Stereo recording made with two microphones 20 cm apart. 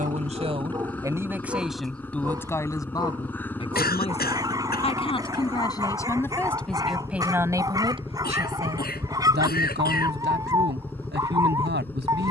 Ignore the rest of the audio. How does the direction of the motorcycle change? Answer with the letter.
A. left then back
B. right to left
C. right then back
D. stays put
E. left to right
D.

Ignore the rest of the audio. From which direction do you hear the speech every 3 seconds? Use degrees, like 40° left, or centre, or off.
10° right, 20° left, 10° right, 60° right.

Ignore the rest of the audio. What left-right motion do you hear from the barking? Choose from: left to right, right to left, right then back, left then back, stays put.
stays put.